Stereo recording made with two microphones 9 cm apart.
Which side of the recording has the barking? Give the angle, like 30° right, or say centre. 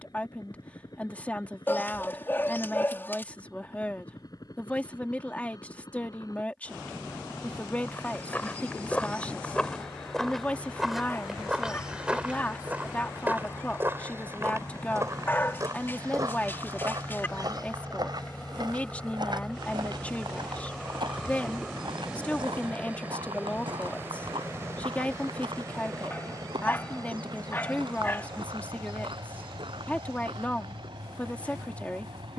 30° left.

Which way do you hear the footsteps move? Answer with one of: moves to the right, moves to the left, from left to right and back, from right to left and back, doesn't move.
moves to the right.